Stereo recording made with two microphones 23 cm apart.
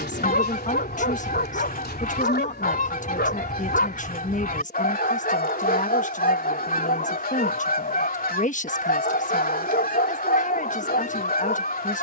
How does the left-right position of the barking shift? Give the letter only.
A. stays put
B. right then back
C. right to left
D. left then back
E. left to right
A.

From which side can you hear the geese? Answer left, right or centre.
left.